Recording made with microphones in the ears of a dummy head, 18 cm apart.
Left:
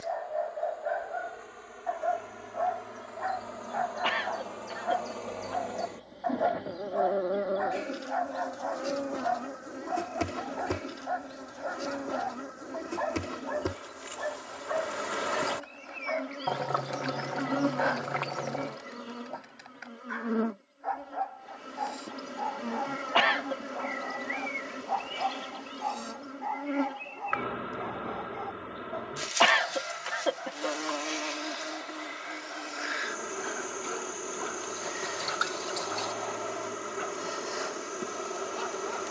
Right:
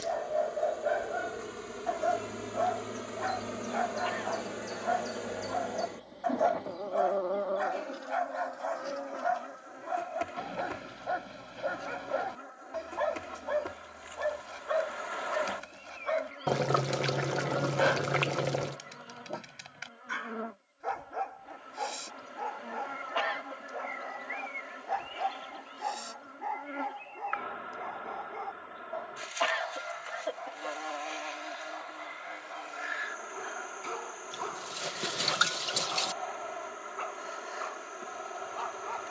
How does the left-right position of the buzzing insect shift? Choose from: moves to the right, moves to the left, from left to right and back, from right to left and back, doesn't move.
moves to the left.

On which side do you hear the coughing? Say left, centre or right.
left.